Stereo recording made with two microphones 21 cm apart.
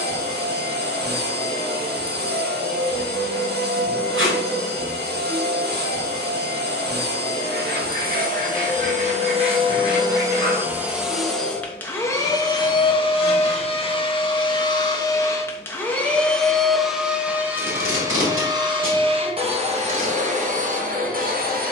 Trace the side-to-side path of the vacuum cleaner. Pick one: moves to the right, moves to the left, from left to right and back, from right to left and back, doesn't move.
from right to left and back.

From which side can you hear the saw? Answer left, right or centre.
right.